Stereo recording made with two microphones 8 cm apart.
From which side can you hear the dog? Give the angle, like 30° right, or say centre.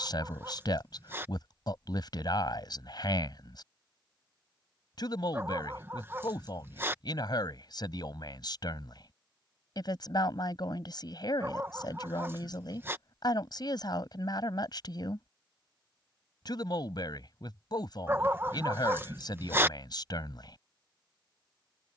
30° right.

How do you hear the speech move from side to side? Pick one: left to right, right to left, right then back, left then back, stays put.
stays put.